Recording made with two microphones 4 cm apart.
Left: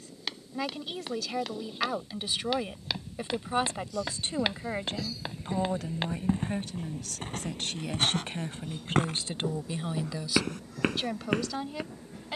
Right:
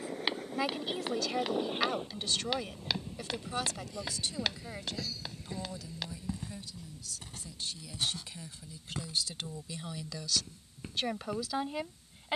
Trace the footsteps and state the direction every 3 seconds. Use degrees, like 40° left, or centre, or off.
10° right, 20° left, 50° left, 60° left.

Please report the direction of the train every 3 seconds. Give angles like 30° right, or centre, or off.
50° right, 10° right, 50° left, 70° left.